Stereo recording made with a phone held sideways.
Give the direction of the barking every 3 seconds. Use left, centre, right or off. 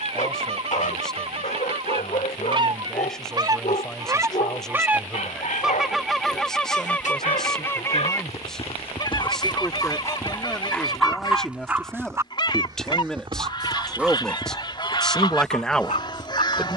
left, left, left, centre, centre, left.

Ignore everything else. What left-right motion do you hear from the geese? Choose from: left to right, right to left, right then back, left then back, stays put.
right to left.